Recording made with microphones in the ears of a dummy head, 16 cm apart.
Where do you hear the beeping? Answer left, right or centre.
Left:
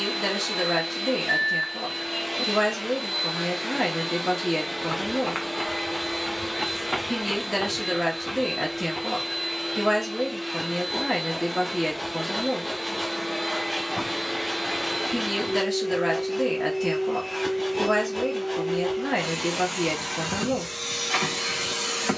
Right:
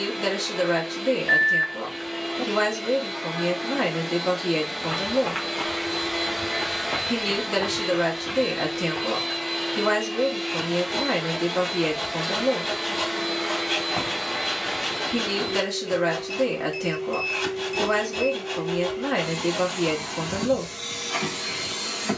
right.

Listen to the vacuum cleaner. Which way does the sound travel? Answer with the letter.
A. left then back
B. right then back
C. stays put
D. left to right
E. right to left
B.